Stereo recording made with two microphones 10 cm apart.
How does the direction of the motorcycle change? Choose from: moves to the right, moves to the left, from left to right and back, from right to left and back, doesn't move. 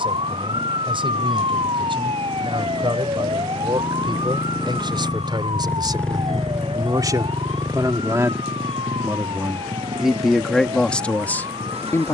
moves to the right.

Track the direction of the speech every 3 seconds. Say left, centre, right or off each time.
right, right, right, centre.